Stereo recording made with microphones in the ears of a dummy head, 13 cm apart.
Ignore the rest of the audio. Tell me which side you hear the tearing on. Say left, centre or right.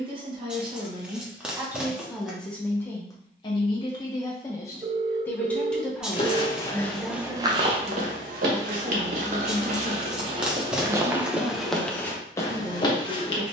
centre.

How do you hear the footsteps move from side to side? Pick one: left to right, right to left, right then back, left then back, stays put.
right then back.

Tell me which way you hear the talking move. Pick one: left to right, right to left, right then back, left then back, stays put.
left then back.